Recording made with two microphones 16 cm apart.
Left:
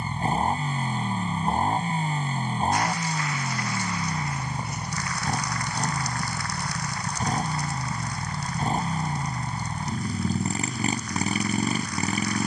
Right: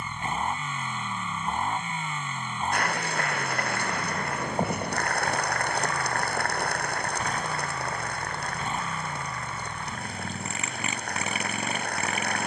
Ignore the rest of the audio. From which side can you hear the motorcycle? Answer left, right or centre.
left.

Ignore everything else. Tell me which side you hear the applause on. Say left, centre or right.
right.